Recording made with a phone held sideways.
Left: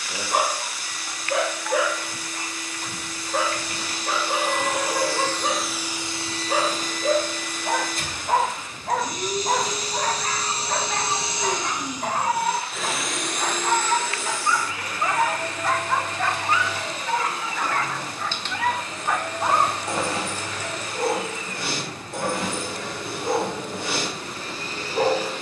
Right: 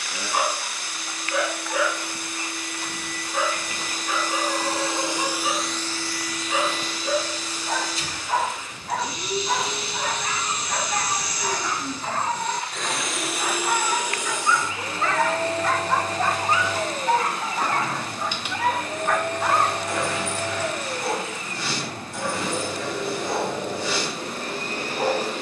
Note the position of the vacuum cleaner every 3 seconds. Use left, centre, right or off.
right, right, left, left, centre, right, right, right, right.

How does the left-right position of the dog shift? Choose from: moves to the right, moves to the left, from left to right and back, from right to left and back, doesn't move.
from left to right and back.